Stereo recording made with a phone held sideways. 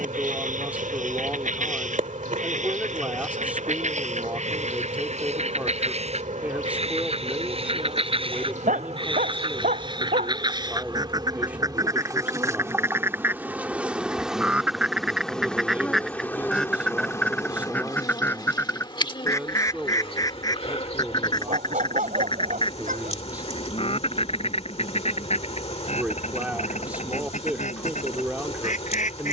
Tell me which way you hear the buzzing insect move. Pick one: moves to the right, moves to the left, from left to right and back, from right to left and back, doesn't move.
moves to the left.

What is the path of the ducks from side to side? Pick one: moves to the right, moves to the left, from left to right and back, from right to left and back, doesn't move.
moves to the left.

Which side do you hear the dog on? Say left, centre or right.
right.